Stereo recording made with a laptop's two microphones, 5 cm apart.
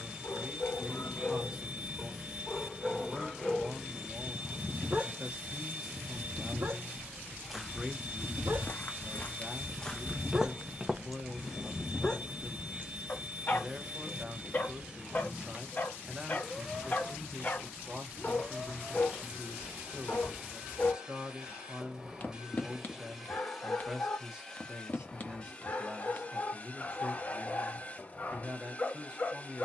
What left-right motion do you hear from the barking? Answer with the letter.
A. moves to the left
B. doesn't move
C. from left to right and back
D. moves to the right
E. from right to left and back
C.